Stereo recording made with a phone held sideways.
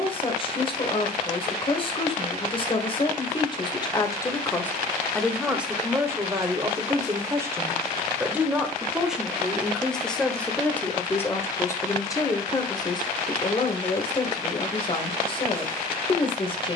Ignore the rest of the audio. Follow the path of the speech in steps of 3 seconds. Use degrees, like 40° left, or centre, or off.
30° left, 10° left, 20° right, 10° left, 30° left, 30° left.